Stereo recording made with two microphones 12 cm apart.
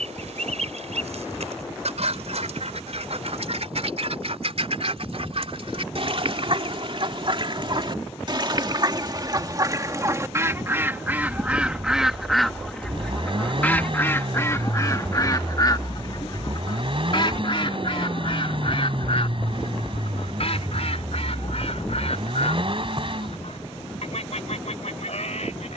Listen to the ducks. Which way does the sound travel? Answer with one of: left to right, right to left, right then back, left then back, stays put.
right to left.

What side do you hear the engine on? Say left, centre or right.
right.